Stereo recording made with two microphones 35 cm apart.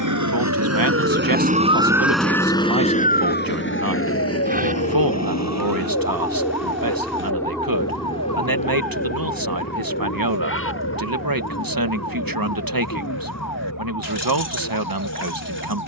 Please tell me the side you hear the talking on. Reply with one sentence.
In this clip you hear the talking on the right.